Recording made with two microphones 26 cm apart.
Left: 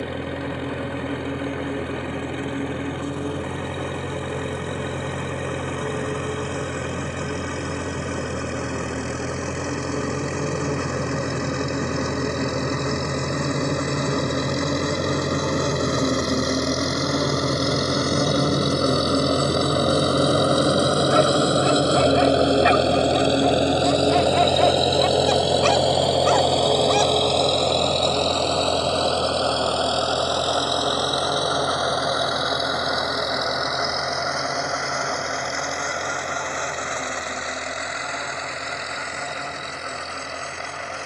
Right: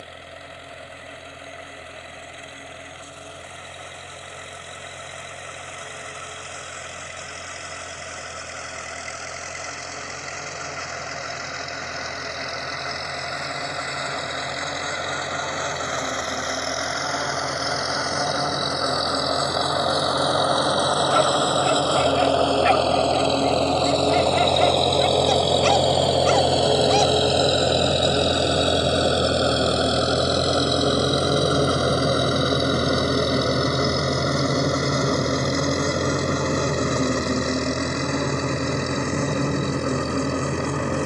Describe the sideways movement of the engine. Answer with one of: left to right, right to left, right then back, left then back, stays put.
left to right.